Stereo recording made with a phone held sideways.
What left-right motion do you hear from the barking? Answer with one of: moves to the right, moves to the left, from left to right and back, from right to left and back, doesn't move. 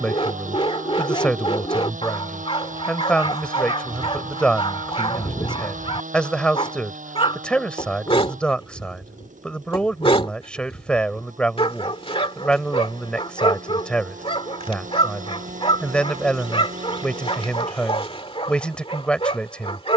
doesn't move.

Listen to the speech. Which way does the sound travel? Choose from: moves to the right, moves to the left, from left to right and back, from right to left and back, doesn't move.
doesn't move.